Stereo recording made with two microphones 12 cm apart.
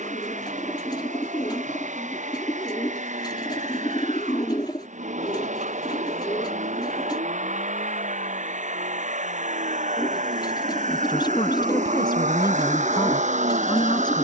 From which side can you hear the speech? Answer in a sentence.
In this clip you hear the speech on the left.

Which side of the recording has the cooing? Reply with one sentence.
In this clip you hear the cooing on the left.